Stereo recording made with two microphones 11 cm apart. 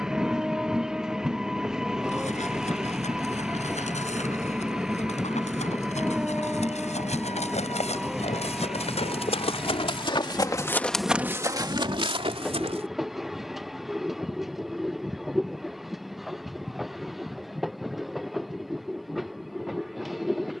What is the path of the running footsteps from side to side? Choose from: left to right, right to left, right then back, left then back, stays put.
left to right.